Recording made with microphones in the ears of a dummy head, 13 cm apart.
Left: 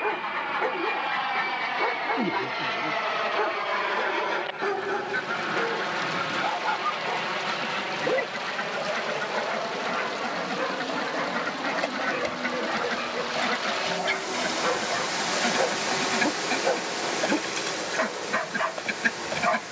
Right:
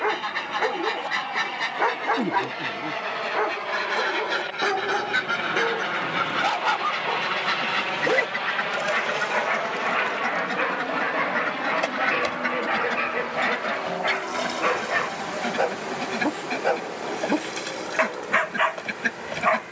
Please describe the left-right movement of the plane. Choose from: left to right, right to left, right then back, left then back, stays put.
left to right.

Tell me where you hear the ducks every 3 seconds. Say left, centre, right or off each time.
right, right, right, right, centre, centre, centre.